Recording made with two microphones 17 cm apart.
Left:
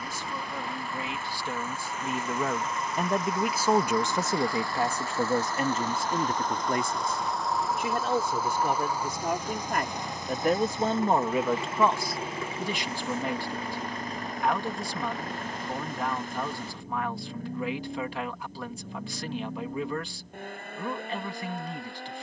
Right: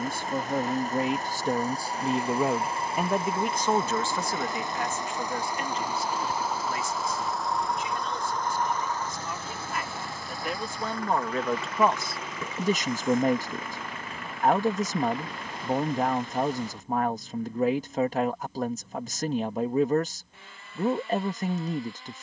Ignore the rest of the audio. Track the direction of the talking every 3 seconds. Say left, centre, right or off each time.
right, left, left, left, right, right, right, right.